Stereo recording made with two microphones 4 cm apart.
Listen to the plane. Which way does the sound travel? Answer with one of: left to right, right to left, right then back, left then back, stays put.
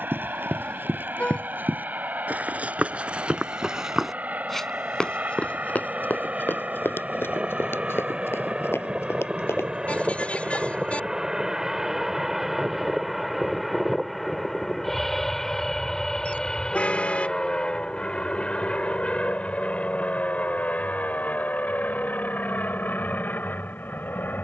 right to left.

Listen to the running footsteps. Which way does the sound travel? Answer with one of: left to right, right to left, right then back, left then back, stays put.
right to left.